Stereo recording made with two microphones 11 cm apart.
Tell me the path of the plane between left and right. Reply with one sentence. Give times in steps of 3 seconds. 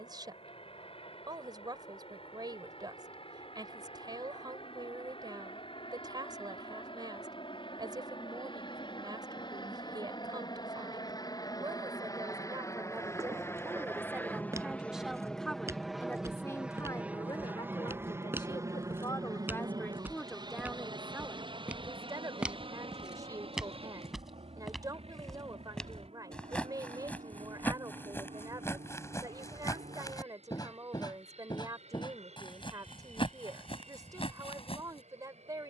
You can hear the plane on the left from 0 s, in the centre from 15 s and on the right from 18 s.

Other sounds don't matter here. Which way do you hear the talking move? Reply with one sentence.
In this clip you hear the talking move from right to left and back again.